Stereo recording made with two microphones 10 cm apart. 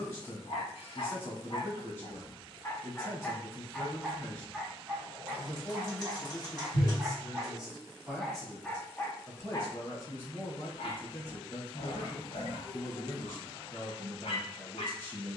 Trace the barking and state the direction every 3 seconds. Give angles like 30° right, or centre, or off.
50° left, 10° right, 10° right, 50° left, 60° left.